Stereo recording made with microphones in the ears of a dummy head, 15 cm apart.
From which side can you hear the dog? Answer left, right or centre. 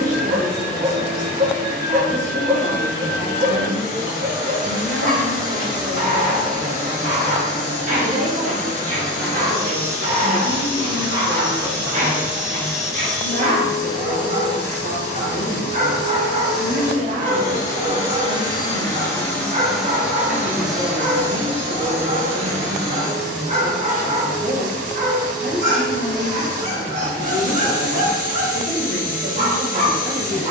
right.